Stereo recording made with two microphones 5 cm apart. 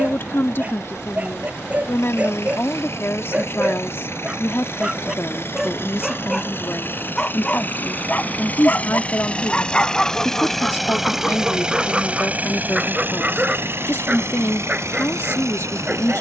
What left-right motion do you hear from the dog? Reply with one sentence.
In this clip you hear the dog move from right to left and back again.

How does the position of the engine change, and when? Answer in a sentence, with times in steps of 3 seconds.
In this clip you hear the engine on the left from 0 s, in the centre from 9 s and on the right from 12 s.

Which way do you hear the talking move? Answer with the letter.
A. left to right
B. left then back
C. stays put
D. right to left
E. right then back
C.